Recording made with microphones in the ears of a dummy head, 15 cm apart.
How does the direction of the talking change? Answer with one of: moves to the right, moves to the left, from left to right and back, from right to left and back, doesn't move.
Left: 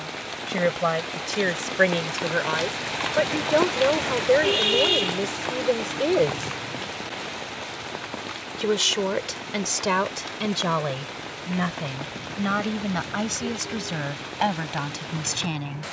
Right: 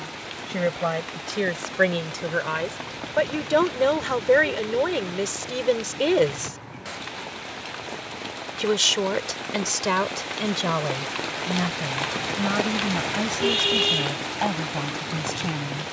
from left to right and back.